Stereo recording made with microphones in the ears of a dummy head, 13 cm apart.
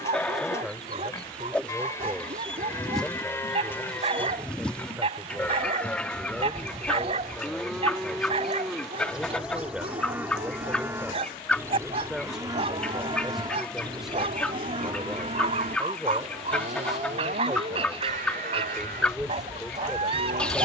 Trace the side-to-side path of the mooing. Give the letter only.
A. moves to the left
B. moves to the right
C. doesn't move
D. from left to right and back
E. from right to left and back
B.